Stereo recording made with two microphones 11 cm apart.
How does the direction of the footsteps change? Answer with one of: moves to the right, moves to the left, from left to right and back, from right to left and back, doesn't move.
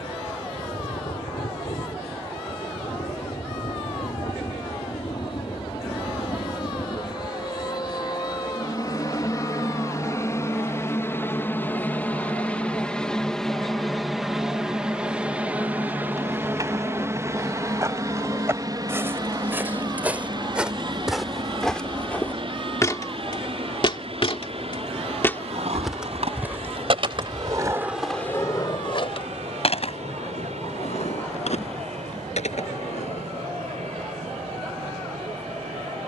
from right to left and back.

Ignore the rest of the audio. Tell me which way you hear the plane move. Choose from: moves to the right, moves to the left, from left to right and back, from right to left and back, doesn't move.
moves to the right.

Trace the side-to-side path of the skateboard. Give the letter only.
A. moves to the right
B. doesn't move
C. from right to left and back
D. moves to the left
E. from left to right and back
D.